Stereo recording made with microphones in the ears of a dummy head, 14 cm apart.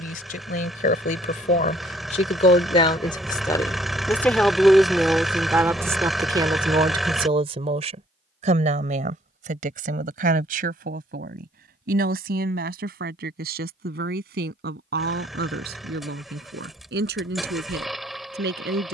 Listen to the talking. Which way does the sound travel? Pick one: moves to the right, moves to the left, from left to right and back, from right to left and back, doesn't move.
moves to the right.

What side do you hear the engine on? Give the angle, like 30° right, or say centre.
centre.